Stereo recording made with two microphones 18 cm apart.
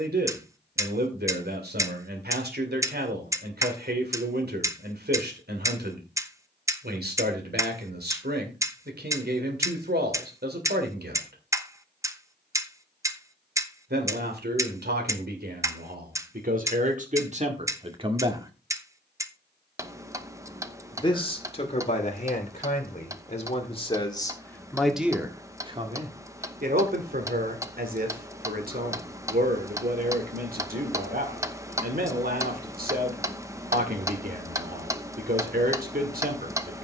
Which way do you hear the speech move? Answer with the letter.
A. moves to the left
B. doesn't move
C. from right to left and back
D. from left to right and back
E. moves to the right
C.